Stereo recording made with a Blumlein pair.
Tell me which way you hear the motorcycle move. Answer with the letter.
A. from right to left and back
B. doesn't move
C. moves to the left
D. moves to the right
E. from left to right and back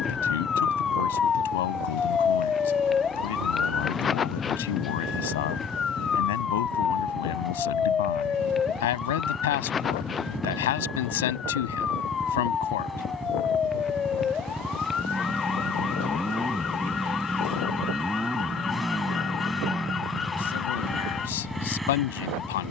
B.